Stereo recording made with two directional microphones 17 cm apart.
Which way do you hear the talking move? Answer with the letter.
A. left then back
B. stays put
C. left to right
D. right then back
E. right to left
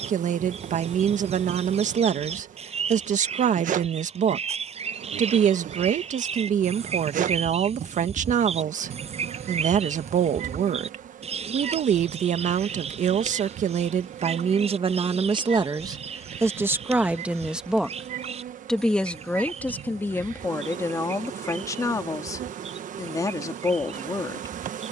E.